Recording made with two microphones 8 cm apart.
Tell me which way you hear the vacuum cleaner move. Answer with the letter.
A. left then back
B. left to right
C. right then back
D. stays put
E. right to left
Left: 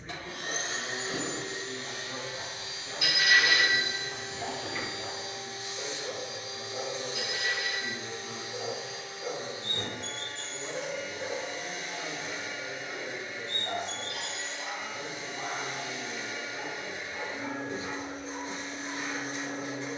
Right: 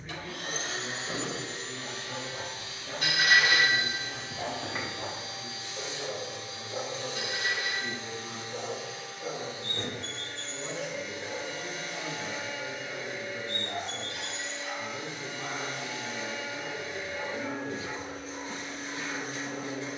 D.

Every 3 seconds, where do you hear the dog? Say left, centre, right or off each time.
right, right, right, left, left, left, left.